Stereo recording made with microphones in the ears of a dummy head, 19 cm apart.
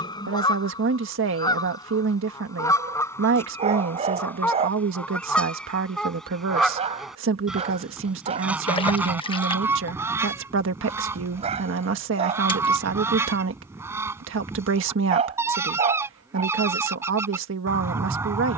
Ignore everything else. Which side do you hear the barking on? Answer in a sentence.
In this clip you hear the barking on the right.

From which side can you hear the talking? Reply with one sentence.
In this clip you hear the talking on the right.